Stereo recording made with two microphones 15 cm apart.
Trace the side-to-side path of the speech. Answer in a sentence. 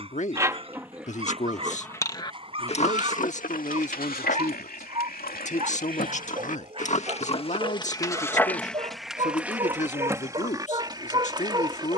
In this clip you hear the speech stay in one place.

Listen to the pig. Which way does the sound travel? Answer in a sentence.
In this clip you hear the pig move from right to left and back again.